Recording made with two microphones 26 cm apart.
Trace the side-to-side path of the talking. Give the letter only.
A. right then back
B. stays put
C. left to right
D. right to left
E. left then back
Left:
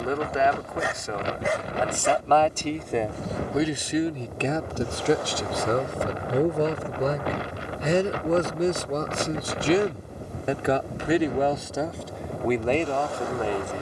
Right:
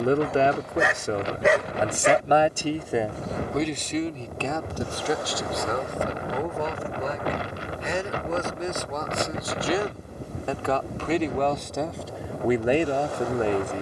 E.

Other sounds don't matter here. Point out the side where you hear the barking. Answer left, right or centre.
right.